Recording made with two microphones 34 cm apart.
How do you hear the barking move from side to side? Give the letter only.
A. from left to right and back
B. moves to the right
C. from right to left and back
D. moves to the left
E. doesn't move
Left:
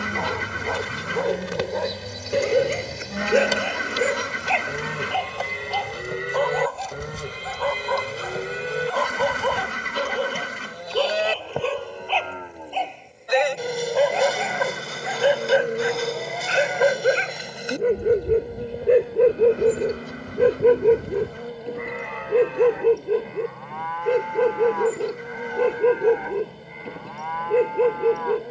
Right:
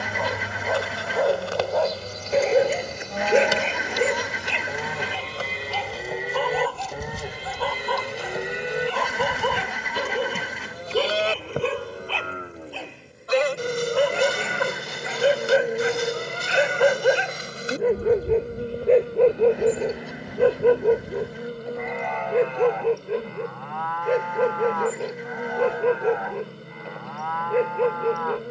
A.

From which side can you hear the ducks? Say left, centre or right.
centre.